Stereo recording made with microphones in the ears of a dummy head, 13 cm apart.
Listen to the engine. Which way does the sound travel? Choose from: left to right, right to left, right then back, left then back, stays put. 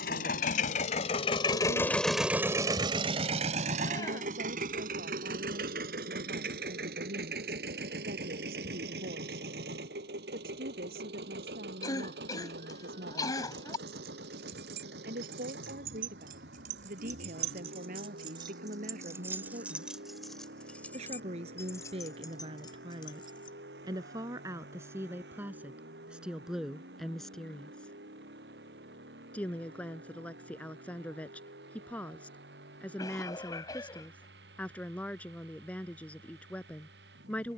left to right.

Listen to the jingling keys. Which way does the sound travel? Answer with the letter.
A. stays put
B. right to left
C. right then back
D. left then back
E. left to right
B.